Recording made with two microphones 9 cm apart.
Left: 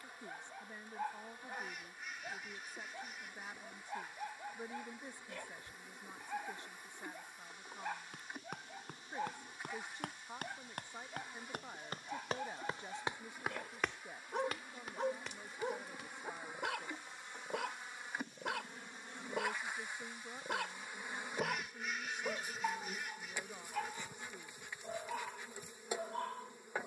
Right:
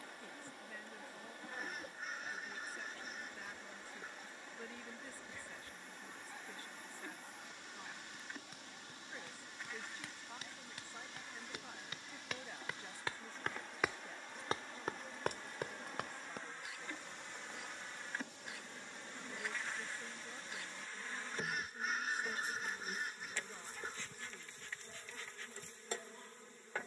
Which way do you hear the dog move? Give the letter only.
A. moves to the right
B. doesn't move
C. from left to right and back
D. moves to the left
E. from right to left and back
B.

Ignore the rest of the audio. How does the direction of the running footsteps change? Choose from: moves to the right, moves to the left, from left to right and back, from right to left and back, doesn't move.
moves to the right.